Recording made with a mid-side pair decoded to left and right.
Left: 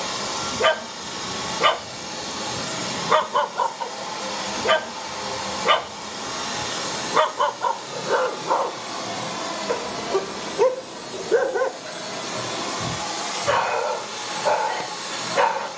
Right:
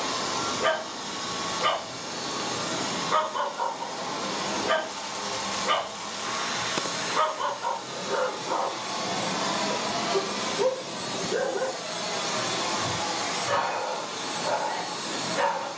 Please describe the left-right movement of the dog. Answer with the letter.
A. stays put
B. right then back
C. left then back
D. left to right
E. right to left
A.